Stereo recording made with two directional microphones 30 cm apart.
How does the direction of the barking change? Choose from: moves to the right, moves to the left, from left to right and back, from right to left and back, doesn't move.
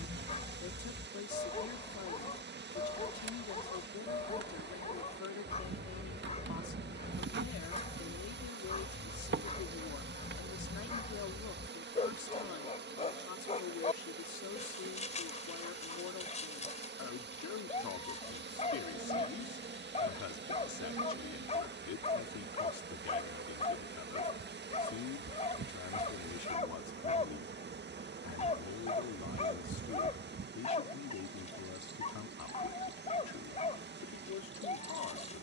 doesn't move.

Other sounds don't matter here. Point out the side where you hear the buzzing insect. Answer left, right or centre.
right.